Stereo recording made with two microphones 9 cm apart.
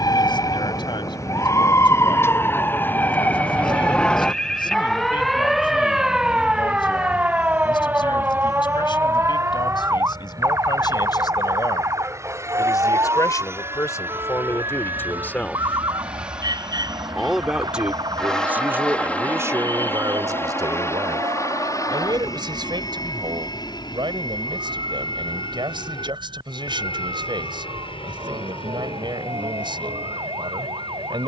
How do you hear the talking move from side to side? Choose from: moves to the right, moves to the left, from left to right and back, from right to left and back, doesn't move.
moves to the right.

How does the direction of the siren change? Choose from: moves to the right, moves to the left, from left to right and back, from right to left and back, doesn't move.
moves to the right.